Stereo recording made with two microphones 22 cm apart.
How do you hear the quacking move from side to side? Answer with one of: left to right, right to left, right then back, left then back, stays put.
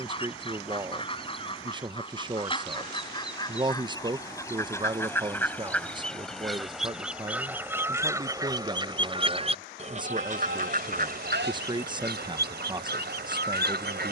left to right.